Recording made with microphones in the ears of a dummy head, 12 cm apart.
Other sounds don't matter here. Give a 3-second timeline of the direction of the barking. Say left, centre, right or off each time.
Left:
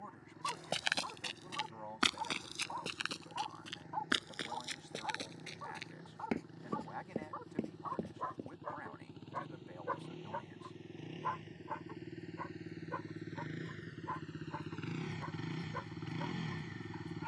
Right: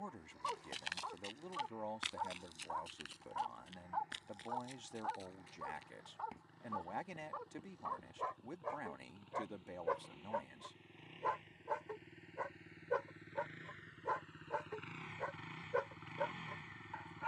centre, centre, centre, right, right, right.